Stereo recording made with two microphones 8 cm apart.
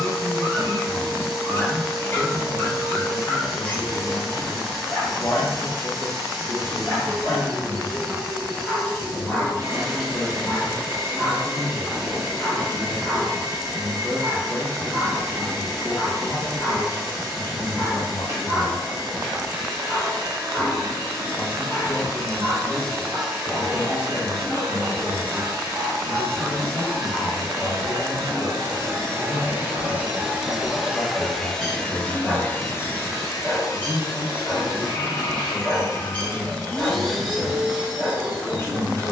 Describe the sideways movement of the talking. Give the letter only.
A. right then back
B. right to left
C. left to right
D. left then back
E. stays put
E.